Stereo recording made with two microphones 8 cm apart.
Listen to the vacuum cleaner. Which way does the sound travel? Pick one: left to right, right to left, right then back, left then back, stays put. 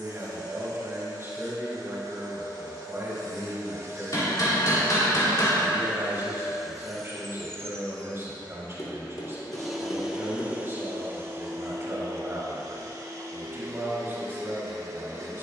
left then back.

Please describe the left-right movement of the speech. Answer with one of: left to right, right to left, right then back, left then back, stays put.
stays put.